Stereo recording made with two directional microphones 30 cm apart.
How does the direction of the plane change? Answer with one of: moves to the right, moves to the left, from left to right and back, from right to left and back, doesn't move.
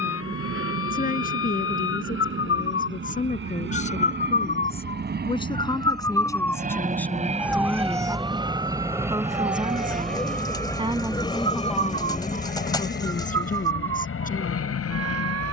moves to the left.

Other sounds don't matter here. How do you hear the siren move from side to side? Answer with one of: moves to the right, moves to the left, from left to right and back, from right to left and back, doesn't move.
moves to the right.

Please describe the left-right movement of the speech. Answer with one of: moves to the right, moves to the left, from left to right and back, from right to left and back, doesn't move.
from left to right and back.